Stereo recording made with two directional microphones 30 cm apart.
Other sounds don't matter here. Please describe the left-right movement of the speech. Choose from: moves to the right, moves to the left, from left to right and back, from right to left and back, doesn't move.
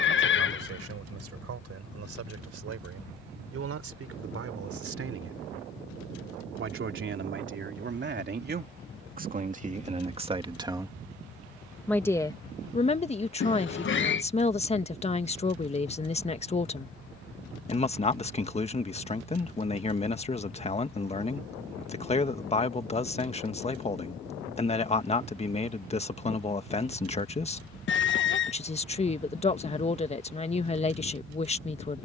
moves to the left.